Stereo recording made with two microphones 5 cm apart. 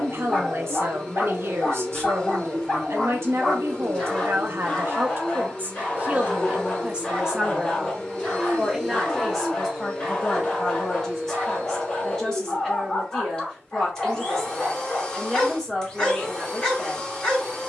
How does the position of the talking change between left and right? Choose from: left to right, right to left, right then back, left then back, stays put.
right to left.